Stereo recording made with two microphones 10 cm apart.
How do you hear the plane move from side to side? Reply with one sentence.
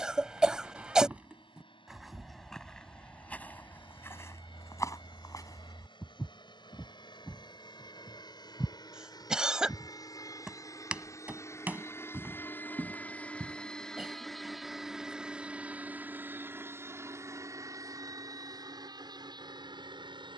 You can hear the plane move to the right.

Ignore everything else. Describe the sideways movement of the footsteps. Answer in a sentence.
In this clip you hear the footsteps move from right to left and back again.